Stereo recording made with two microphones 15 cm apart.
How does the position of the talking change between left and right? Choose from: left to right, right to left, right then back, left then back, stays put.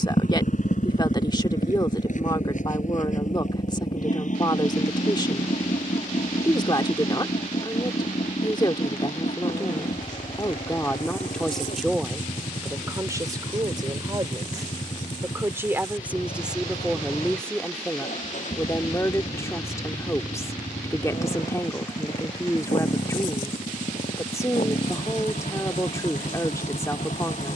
right then back.